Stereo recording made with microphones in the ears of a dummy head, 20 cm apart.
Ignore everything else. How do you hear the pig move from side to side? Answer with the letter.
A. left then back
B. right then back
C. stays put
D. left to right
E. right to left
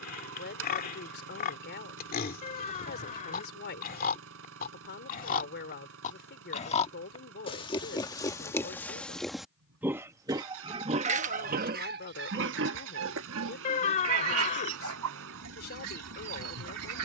D.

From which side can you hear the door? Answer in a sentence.
In this clip you hear the door on the left.